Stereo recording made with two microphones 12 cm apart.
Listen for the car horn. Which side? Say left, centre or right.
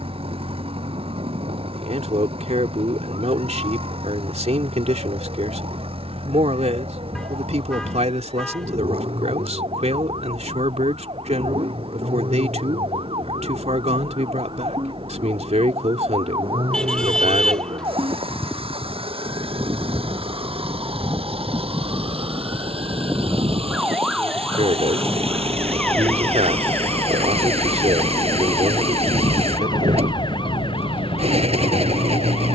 centre.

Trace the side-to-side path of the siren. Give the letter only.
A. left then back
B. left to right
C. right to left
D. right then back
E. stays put
C.